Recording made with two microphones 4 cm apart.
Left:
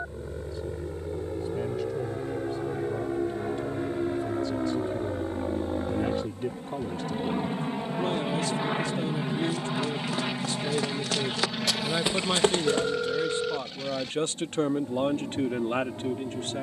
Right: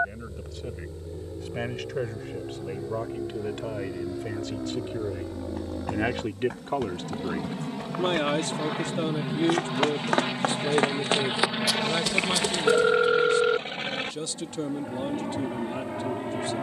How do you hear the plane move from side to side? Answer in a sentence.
You can hear the plane go from the left side to the right.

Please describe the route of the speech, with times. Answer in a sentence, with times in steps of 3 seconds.
In this clip you hear the speech on the right from 0 s and on the left from 12 s.